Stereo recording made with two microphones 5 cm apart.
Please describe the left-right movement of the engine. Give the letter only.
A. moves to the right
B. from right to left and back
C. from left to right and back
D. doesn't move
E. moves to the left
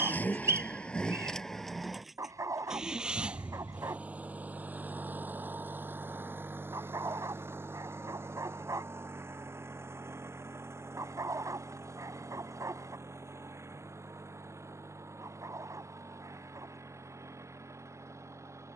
A.